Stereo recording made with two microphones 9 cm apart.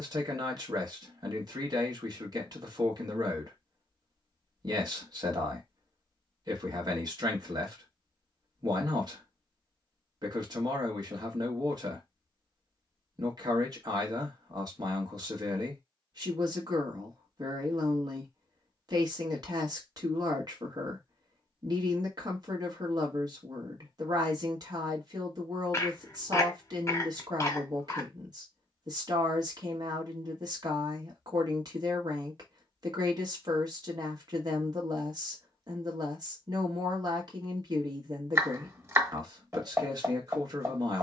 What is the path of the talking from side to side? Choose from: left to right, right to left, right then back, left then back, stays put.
stays put.